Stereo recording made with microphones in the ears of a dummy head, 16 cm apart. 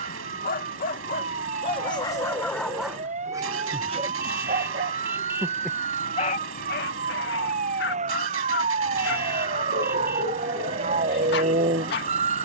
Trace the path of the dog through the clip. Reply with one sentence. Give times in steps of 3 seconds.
You can hear the dog on the left from 0 s, on the right from 3 s and on the left from 6 s.